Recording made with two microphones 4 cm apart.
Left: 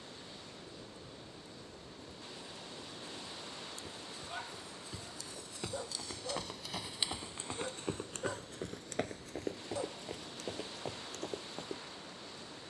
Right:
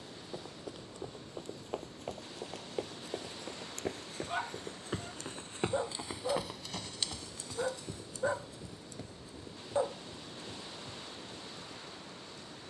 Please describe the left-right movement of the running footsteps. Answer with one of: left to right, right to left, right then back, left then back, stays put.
right to left.